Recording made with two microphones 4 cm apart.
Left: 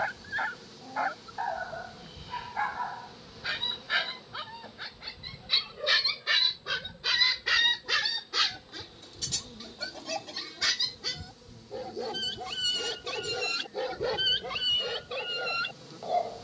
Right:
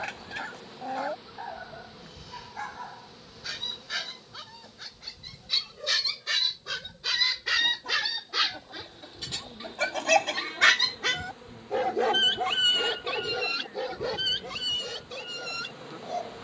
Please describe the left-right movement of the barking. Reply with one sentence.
You can hear the barking move from left to right and back again.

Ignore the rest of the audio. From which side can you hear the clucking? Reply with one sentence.
In this clip you hear the clucking on the right.